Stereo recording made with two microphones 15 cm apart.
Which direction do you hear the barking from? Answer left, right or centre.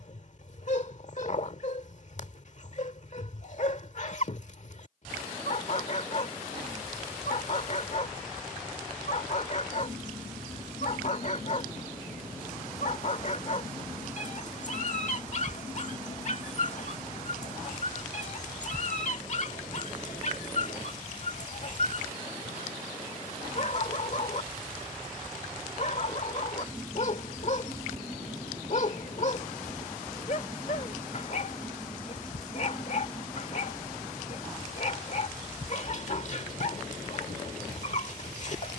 left.